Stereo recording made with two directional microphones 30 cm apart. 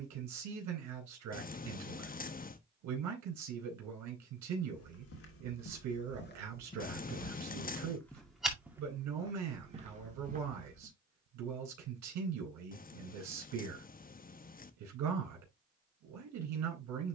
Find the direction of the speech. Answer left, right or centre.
right.